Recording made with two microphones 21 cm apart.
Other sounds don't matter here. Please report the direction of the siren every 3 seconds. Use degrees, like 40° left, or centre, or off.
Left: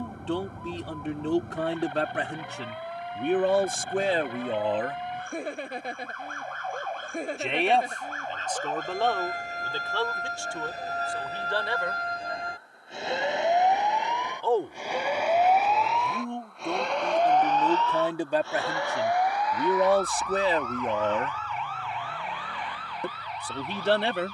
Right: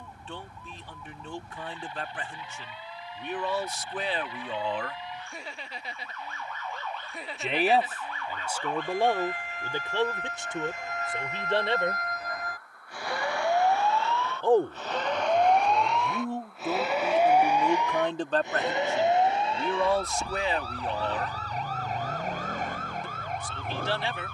60° left, 60° left, 50° left, 40° left, 20° left, centre, 20° right, 40° right.